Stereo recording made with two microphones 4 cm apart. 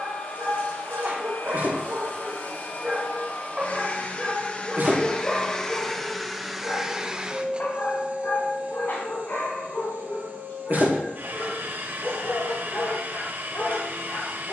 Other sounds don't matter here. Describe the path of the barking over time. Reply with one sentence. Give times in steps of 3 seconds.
You can hear the barking on the right from 0 s, in the centre from 3 s and on the left from 6 s.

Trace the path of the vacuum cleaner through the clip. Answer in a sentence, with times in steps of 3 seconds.
In this clip you hear the vacuum cleaner on the left from 0 s and on the right from 6 s.